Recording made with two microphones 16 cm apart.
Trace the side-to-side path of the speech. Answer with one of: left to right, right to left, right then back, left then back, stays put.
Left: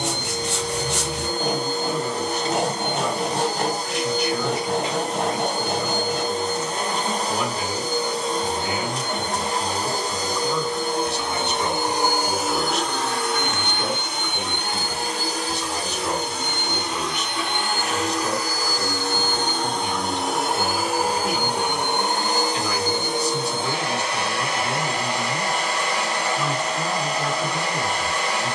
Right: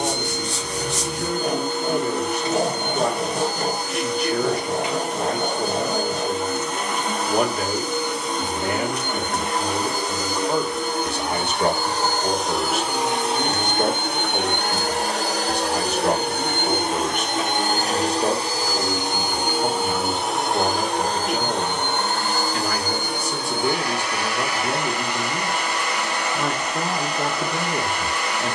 stays put.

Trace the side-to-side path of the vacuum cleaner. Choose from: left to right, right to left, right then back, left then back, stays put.
right then back.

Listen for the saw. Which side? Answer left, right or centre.
left.